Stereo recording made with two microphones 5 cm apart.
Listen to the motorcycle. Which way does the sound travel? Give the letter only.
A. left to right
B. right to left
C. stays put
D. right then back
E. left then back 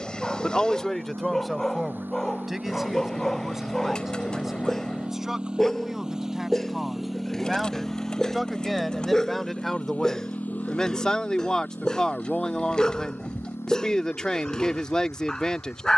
B.